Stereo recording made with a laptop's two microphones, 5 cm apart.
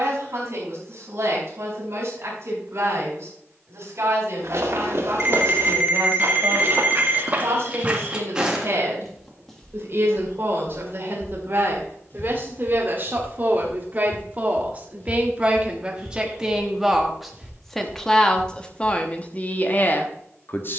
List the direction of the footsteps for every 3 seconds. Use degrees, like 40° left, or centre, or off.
off, 60° right, 30° right, 20° left, 40° left, centre, 50° right.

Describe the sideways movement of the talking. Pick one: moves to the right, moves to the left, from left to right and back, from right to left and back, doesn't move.
moves to the left.